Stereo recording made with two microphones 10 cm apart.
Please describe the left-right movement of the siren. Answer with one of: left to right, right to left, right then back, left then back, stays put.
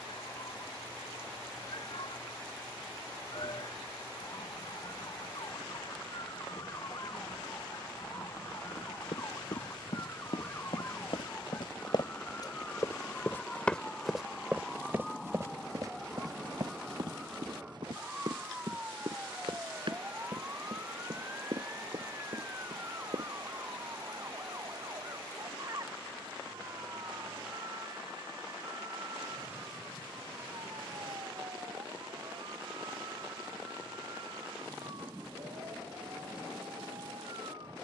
left to right.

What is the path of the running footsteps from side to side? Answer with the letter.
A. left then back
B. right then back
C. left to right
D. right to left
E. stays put
C.